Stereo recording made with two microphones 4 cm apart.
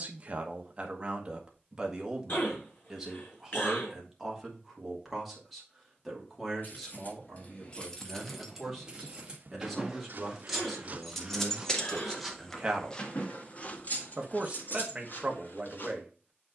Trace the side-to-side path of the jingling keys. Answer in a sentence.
In this clip you hear the jingling keys go right and come back.